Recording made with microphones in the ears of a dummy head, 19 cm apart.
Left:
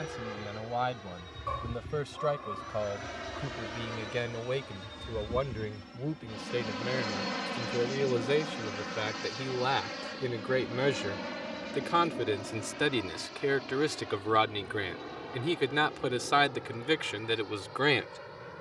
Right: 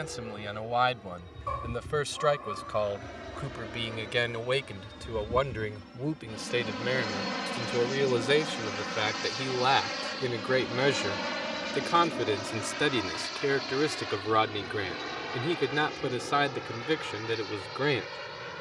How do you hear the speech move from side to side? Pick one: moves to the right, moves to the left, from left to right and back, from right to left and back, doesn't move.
moves to the left.